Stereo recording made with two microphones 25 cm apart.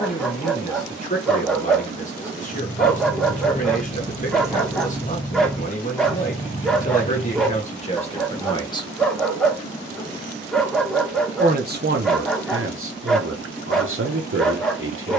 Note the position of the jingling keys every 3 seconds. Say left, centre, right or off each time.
left, centre, left, off, off.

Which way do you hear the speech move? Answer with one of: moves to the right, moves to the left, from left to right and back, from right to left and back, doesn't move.
moves to the right.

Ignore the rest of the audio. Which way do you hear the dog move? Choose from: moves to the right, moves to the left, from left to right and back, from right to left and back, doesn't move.
doesn't move.